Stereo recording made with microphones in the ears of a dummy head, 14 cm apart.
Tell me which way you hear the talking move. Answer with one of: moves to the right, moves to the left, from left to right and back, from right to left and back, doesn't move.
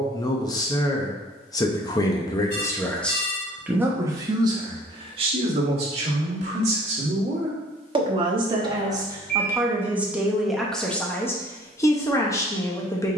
from left to right and back.